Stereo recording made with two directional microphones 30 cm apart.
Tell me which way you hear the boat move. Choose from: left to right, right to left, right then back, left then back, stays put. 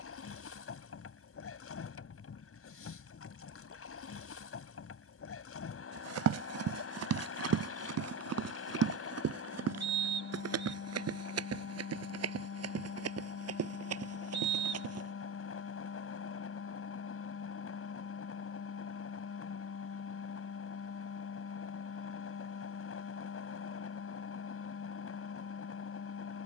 stays put.